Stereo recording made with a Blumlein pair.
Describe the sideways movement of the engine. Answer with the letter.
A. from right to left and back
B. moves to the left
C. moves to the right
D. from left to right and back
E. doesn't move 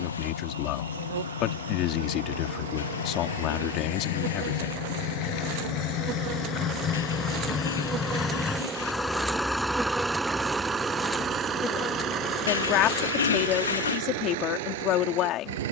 C.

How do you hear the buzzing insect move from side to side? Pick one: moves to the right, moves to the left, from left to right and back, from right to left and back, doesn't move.
moves to the left.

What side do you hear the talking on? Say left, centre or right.
left.